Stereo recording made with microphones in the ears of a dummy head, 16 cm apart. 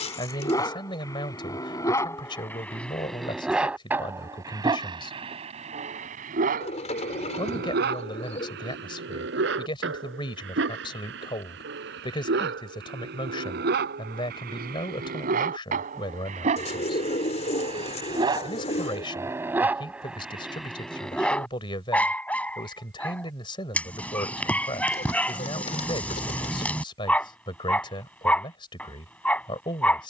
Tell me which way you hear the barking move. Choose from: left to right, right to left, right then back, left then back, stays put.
right then back.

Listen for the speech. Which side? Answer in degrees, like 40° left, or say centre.
30° left.